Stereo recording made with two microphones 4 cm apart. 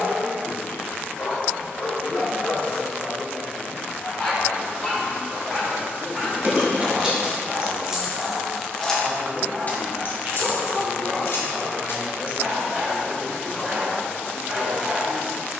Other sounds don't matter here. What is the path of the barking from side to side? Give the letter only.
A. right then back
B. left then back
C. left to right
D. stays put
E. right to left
C.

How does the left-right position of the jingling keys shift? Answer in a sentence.
You can hear the jingling keys travel towards the left.